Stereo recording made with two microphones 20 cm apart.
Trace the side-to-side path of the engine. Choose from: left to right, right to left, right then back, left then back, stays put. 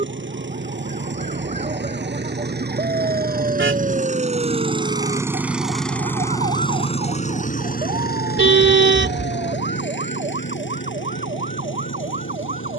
right to left.